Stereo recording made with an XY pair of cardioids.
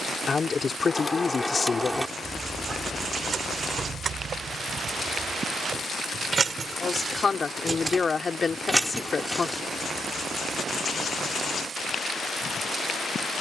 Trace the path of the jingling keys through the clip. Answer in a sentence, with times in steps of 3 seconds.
You can hear the jingling keys in the centre from 0 s, on the right from 3 s, in the centre from 9 s and not at all from 12 s.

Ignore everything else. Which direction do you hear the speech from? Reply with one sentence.
In this clip you hear the speech on the left.